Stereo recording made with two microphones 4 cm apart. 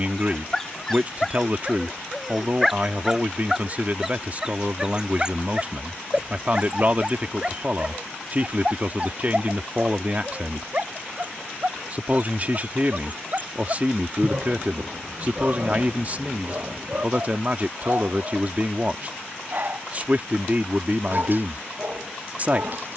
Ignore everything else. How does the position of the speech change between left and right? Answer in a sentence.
In this clip you hear the speech stay put.